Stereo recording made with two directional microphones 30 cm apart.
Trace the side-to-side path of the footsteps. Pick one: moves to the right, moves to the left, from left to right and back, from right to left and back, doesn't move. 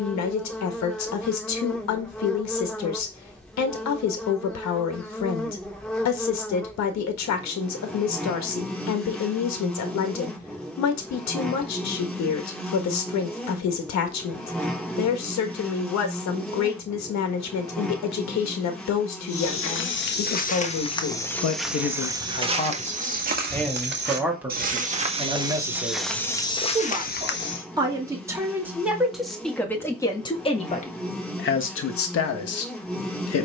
from left to right and back.